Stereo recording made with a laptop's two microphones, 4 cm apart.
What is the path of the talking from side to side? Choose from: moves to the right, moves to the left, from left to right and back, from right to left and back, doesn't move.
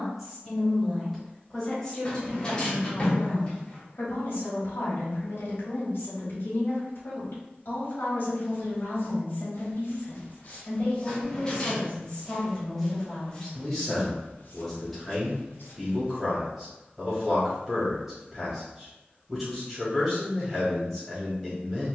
from right to left and back.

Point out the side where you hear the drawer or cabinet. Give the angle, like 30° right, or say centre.
20° left.